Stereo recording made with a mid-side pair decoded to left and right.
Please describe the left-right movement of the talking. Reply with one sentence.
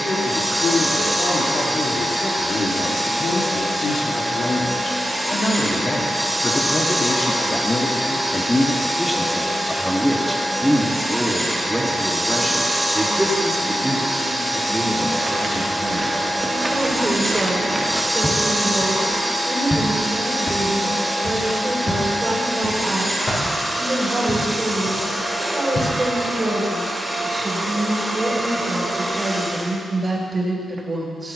In this clip you hear the talking go from the left side to the right.